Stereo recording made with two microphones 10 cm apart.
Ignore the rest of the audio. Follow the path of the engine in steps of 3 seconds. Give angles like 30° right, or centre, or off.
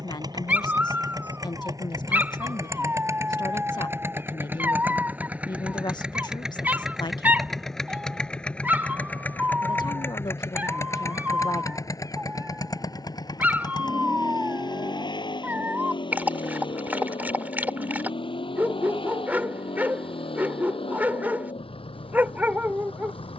40° right, 20° right, centre, 20° left, 40° left, 50° left, 60° left, 70° left.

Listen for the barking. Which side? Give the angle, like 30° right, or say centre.
20° right.